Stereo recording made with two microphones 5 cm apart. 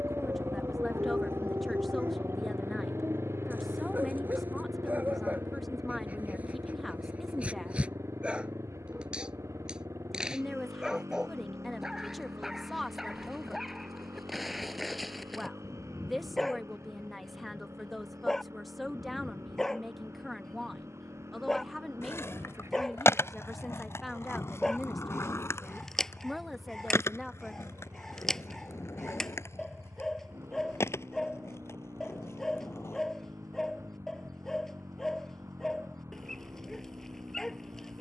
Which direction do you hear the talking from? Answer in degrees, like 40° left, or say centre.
centre.